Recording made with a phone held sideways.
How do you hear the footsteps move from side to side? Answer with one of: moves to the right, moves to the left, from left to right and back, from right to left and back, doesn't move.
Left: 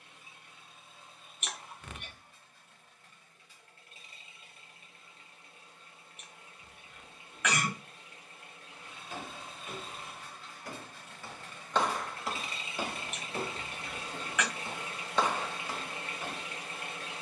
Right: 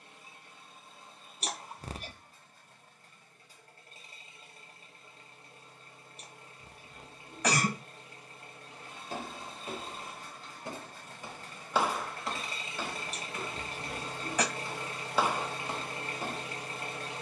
from right to left and back.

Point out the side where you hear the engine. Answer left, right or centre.
right.